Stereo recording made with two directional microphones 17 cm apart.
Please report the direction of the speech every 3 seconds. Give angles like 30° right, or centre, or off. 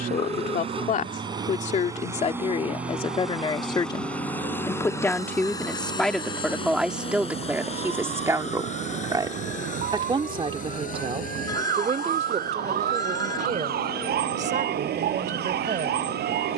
40° left, 20° left, 10° right, 30° right, 40° right, 50° right.